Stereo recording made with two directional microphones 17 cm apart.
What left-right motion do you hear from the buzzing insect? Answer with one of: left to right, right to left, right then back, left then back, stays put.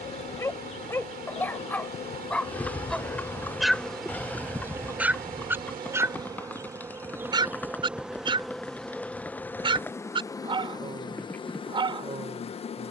right then back.